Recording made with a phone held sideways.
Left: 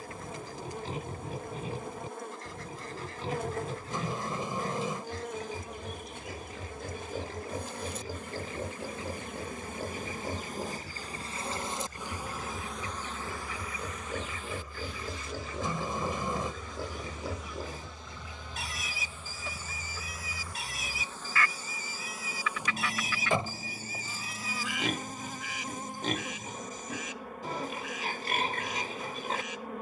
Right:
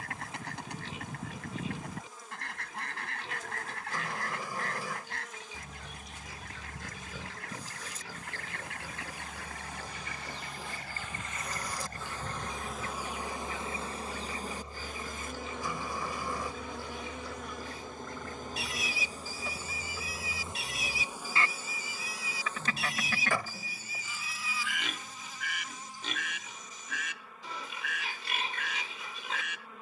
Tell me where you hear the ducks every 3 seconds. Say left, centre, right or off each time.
right, right, right, right, right, centre, centre, right, right, right.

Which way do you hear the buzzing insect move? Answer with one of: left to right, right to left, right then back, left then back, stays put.
right then back.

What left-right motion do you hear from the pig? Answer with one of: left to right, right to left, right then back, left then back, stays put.
stays put.